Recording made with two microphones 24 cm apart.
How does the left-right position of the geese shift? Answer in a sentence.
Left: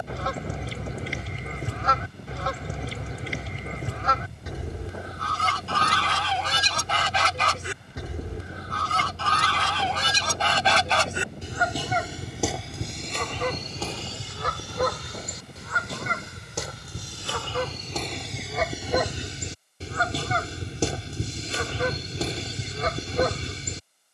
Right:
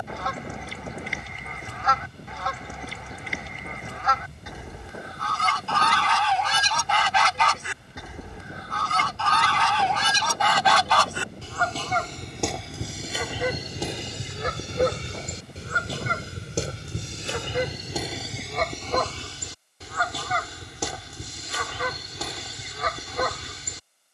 In this clip you hear the geese go right and come back.